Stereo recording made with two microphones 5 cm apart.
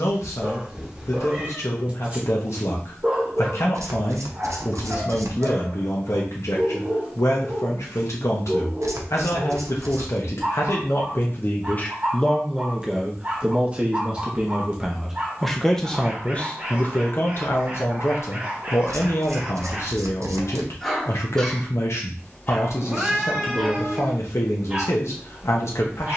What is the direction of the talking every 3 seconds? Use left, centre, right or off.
left, left, left, left, centre, left, left, left, left.